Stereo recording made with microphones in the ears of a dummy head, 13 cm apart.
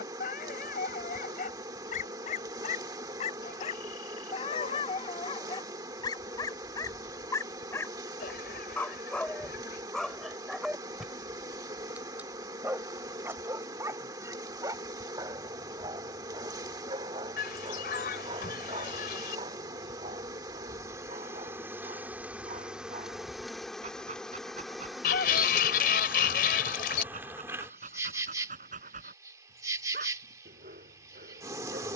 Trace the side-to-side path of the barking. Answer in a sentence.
You can hear the barking move from left to right.